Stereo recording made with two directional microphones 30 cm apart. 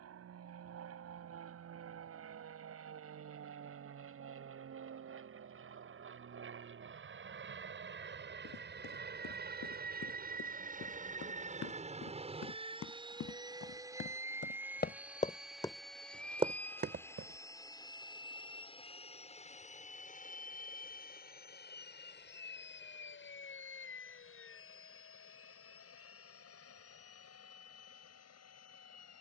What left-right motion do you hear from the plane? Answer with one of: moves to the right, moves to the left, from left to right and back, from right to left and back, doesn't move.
moves to the left.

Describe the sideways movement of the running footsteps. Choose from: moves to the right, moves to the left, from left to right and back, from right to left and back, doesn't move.
moves to the right.